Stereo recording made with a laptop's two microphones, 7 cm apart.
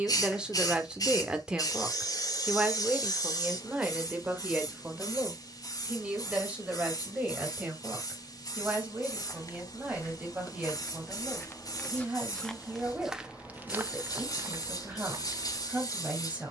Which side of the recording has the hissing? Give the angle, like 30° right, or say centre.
60° left.